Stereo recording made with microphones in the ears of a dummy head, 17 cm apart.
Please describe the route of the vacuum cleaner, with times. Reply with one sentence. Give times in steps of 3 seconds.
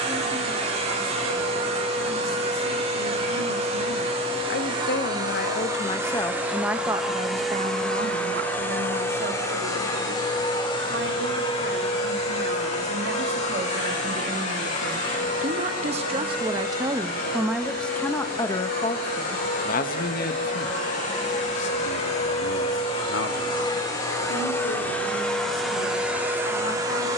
In this clip you hear the vacuum cleaner on the right from 0 s, in the centre from 6 s, on the left from 9 s and in the centre from 24 s.